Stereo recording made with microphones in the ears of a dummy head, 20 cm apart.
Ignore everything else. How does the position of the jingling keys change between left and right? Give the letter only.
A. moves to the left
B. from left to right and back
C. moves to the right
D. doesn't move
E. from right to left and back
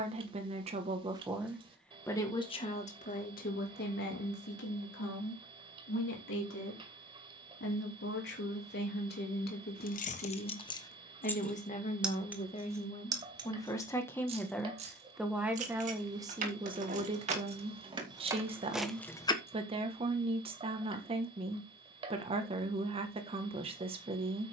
B.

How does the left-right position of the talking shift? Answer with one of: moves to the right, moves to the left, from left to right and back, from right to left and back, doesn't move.
from right to left and back.